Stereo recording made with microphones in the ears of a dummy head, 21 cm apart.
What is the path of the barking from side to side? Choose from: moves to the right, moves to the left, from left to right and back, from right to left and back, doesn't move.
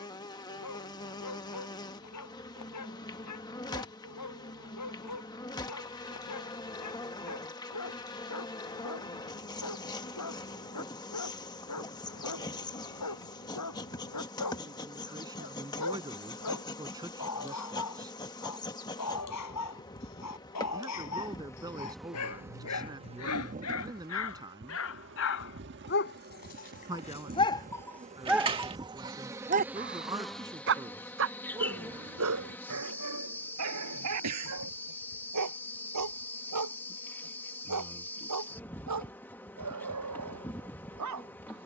moves to the right.